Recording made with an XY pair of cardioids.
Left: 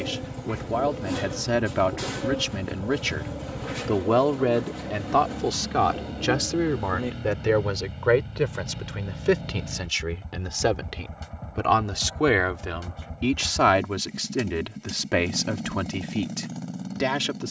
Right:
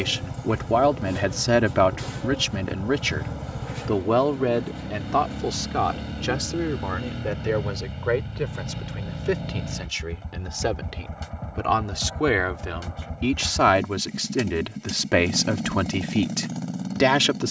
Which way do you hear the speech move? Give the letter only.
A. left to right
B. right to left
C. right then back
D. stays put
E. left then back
E.